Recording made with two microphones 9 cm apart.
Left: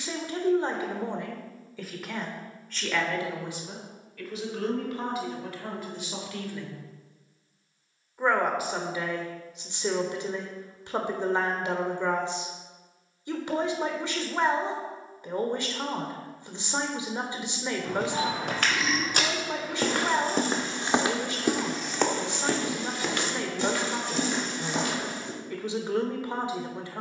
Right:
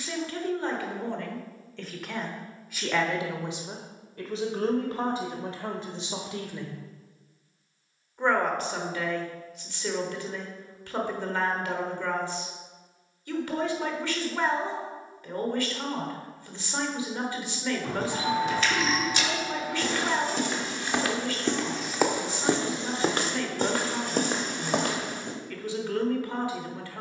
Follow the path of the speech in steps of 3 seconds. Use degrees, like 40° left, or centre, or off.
10° left, 30° right, 10° right, 20° left, 20° left, 20° left, 20° left, 20° left, 20° left.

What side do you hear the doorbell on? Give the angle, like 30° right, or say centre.
centre.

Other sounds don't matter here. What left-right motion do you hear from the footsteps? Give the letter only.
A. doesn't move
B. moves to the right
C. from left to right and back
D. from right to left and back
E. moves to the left
B.